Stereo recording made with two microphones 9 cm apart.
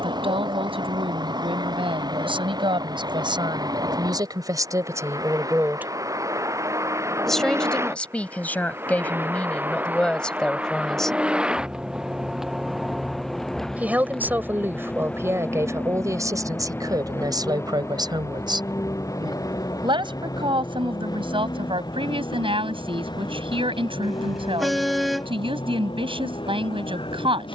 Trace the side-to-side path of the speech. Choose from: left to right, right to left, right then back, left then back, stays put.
left then back.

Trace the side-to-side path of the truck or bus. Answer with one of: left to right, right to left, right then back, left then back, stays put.
right to left.